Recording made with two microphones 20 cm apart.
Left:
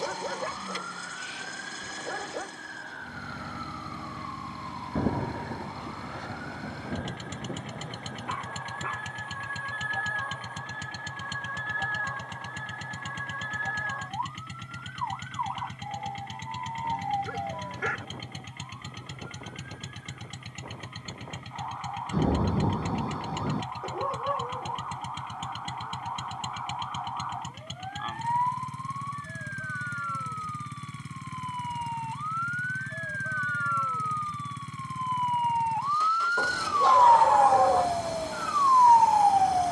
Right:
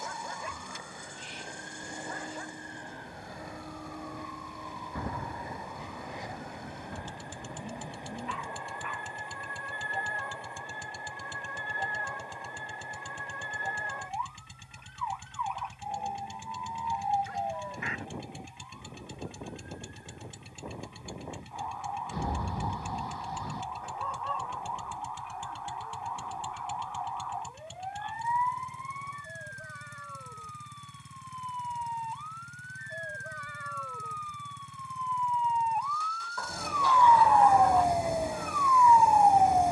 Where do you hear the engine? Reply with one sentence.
In this clip you hear the engine on the left.